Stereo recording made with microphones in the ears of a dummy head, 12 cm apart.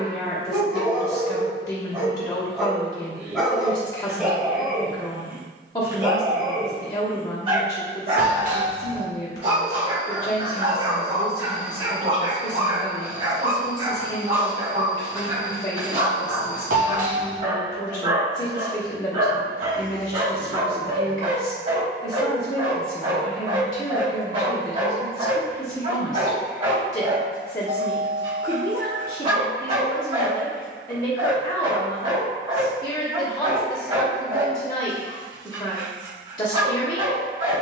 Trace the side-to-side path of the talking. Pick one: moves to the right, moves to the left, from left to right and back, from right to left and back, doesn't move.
doesn't move.